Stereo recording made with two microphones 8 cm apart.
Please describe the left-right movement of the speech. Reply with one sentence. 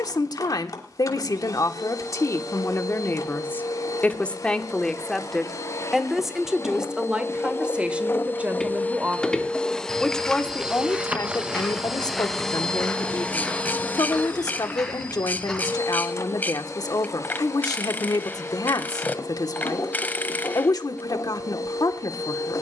You can hear the speech go right and come back.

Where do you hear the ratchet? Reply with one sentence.
You can hear the ratchet on the left.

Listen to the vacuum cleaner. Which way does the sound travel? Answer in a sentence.
In this clip you hear the vacuum cleaner move from left to right and back again.